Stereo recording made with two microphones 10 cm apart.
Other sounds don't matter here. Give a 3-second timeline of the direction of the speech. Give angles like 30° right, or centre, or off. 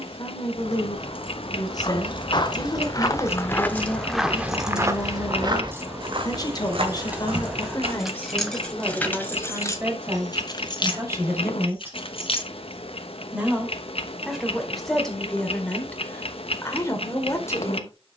40° left, 40° left, 30° left, 20° right, centre, 20° left.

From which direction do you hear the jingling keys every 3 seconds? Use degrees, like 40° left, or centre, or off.
60° left, centre, 10° right, 40° left, 70° left, off.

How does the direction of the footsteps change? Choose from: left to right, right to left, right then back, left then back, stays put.
left to right.